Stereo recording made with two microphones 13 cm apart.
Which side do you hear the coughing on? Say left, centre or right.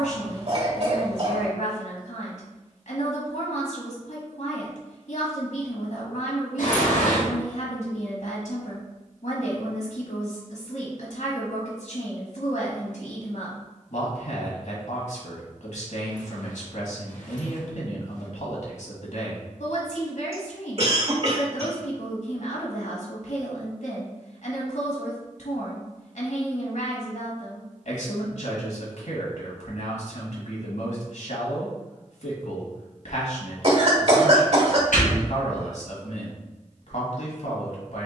right.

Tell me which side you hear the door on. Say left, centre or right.
left.